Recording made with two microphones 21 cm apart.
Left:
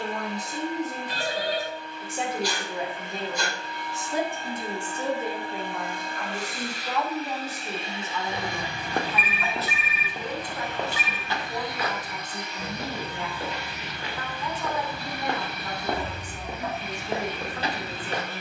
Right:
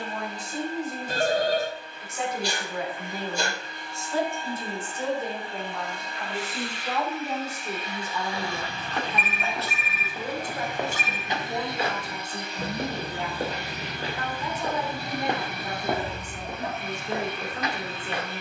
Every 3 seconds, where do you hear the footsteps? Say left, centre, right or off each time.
off, off, left, centre, right, centre.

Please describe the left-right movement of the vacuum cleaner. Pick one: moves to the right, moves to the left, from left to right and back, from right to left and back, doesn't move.
moves to the right.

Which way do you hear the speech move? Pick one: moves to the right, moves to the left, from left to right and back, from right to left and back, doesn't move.
moves to the right.